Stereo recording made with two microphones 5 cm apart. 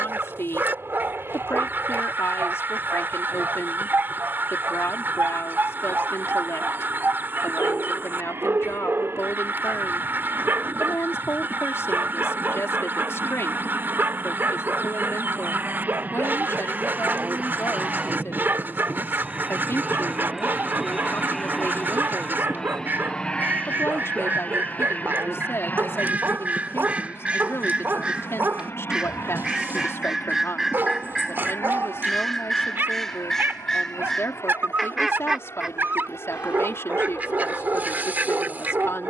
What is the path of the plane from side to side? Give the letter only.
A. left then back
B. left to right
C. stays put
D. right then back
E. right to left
E.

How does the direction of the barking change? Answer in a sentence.
In this clip you hear the barking stay in one place.